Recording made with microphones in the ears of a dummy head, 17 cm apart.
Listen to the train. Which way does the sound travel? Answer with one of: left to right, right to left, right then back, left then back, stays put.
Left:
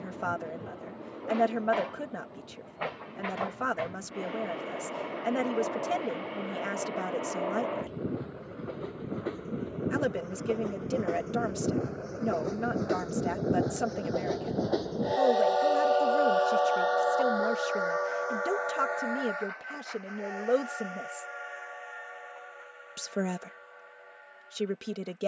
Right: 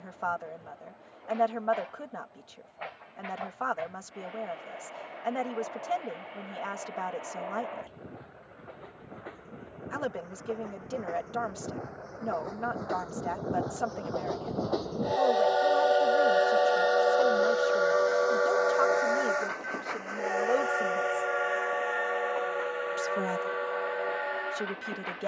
left to right.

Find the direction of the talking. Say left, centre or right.
left.